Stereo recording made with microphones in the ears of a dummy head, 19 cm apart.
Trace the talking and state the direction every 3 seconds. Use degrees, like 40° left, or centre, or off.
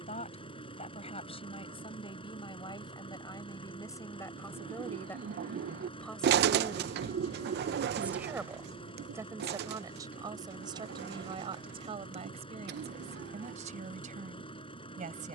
30° left, 10° left, centre, 20° right, 30° right.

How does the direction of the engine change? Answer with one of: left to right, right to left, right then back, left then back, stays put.
stays put.